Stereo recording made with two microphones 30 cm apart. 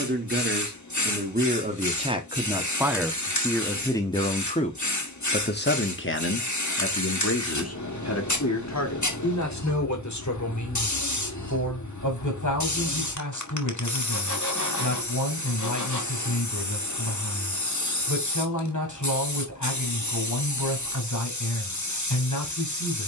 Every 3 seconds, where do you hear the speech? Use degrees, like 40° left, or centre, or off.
20° right, 20° left, 50° left, 70° left, 70° left, 70° left, 70° left, 70° left.